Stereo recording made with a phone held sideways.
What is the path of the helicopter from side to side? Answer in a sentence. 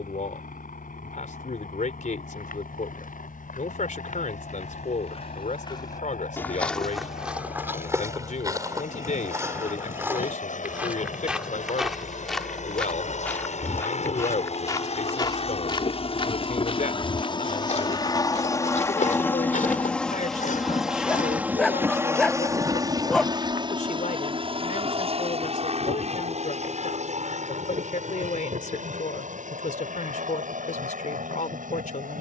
In this clip you hear the helicopter go from the left side to the right.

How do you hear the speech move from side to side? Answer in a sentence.
You can hear the speech stay put.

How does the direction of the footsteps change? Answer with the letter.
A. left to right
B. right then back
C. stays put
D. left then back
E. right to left
B.